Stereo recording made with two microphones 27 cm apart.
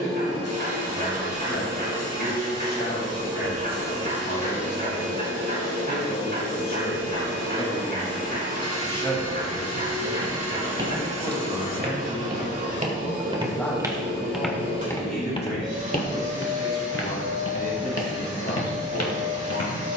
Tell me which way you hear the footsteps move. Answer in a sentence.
In this clip you hear the footsteps move to the left.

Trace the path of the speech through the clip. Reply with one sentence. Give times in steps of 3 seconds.
In this clip you hear the speech on the left from 0 s, in the centre from 9 s and on the left from 15 s.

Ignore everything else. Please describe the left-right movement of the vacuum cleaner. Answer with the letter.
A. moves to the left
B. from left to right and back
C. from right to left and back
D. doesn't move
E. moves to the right
D.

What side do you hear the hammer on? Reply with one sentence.
In this clip you hear the hammer on the right.